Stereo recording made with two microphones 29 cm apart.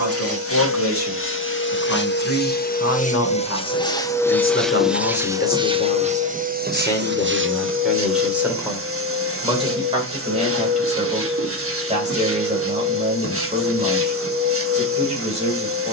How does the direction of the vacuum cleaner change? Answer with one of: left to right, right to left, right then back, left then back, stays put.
left to right.